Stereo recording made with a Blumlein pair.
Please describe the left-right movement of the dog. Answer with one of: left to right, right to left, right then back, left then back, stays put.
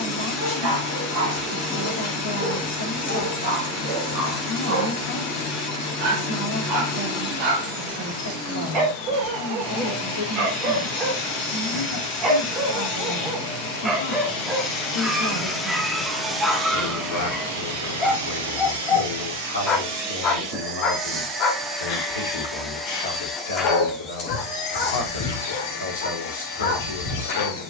right to left.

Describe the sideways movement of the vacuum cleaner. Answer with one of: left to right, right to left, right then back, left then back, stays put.
right then back.